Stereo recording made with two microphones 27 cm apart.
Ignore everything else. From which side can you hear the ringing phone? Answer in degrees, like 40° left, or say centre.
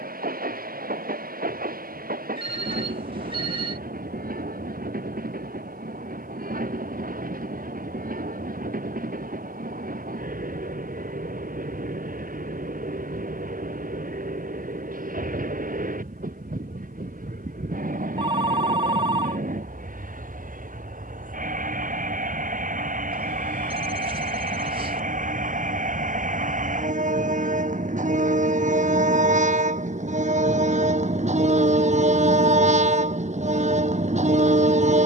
20° right.